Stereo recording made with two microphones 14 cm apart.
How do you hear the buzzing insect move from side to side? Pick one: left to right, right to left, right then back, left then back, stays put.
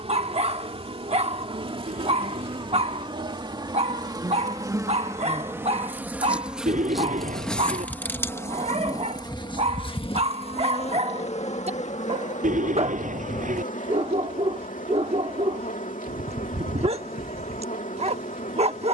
right to left.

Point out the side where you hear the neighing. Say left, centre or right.
right.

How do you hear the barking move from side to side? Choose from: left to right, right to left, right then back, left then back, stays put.
stays put.